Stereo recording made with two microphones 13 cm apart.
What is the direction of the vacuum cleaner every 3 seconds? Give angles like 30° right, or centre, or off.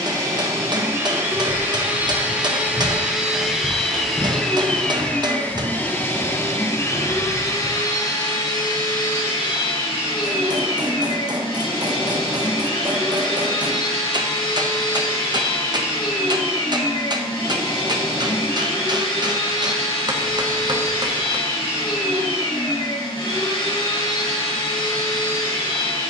20° right, centre, 30° left, 40° left, 40° left, 40° left, 40° left, 40° left, 40° left.